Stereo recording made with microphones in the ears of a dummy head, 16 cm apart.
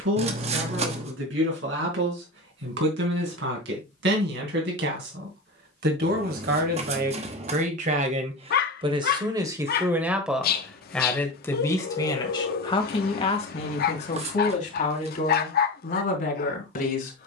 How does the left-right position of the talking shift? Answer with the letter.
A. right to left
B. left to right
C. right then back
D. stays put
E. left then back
A.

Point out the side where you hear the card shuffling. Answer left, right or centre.
right.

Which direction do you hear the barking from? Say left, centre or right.
left.